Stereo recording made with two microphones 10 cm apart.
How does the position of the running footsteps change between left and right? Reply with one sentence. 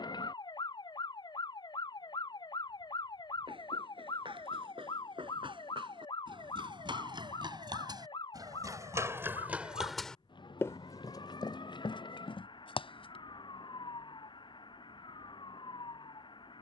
You can hear the running footsteps travel towards the left.